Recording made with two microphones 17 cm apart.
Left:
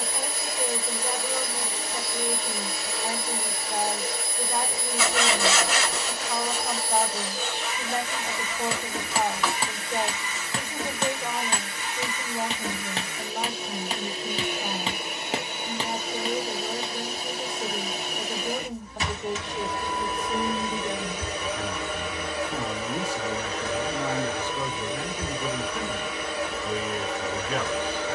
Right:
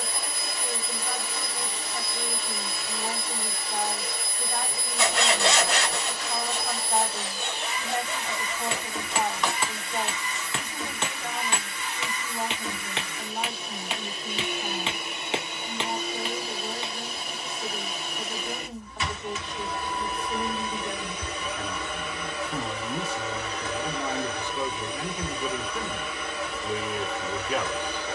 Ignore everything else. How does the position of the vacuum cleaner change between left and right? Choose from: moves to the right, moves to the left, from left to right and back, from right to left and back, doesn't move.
doesn't move.